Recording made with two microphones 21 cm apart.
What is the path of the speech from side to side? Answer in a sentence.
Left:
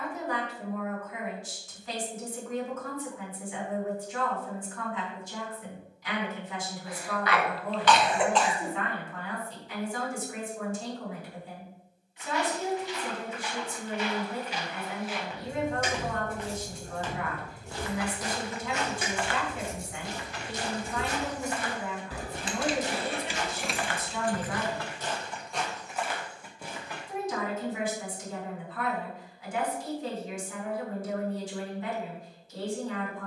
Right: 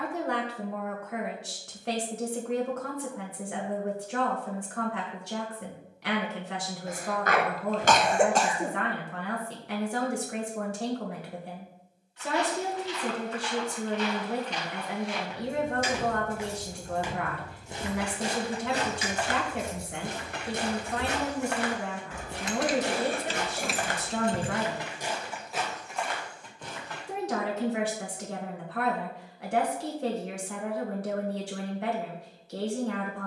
In this clip you hear the speech stay put.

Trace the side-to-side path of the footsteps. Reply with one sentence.
In this clip you hear the footsteps move from left to right and back again.